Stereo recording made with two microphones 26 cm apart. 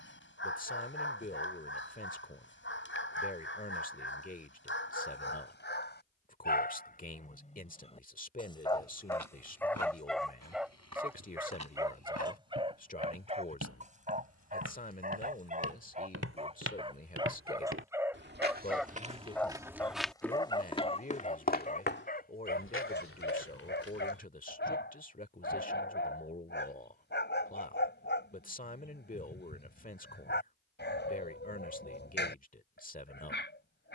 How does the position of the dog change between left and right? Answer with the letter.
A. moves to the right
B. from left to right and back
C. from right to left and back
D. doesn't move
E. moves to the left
B.